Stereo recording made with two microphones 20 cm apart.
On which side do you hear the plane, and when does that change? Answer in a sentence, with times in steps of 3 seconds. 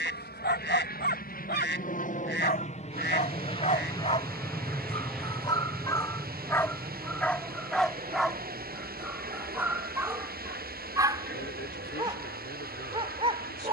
You can hear the plane on the left from 0 s, in the centre from 3 s and on the right from 6 s.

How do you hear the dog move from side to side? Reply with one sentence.
In this clip you hear the dog move from left to right.